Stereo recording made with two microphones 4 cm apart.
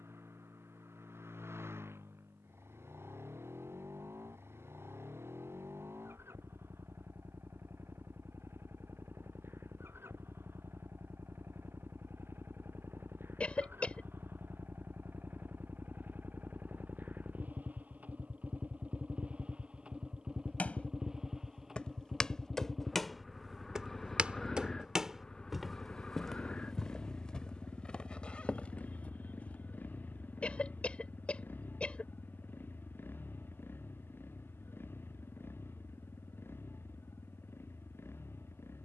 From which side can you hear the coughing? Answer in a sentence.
In this clip you hear the coughing on the left.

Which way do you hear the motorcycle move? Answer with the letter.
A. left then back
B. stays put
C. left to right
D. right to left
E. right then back
D.